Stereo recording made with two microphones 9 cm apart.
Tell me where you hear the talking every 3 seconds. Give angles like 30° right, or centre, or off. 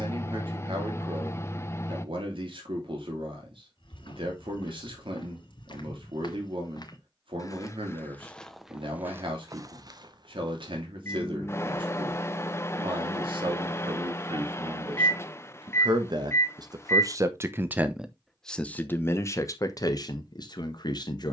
80° right, 80° right, 80° right, 80° right, 80° right, 50° right, 40° left.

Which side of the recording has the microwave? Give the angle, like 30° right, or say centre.
30° left.